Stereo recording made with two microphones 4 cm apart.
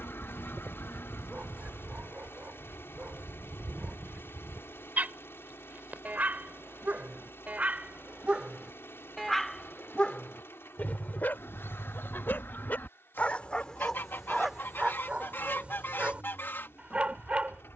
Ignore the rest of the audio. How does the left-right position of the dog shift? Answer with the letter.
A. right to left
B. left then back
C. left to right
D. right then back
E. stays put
B.